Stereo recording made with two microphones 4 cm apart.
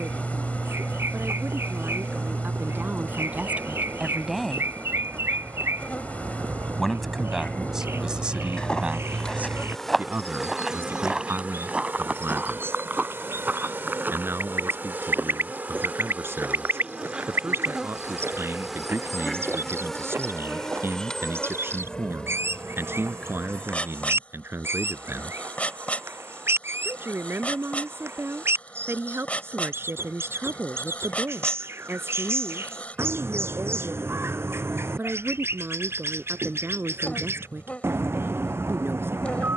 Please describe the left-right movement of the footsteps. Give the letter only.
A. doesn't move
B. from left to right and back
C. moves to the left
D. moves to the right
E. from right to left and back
D.